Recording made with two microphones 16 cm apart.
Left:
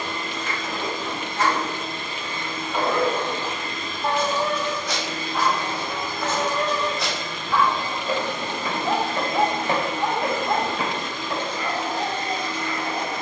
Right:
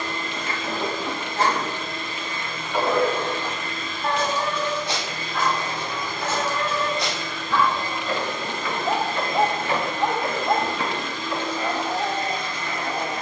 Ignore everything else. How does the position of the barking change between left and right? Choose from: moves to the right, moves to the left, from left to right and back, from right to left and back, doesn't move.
from right to left and back.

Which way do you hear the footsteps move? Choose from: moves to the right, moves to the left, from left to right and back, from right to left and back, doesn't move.
moves to the left.